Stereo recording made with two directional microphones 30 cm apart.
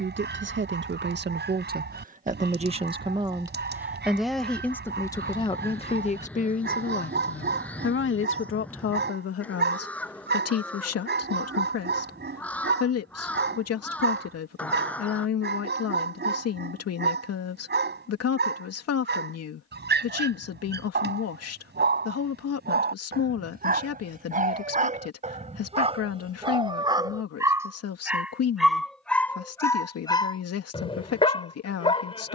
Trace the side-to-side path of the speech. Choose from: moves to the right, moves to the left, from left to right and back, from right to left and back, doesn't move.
moves to the left.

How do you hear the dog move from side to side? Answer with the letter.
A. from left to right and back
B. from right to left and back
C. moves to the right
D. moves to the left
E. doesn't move
D.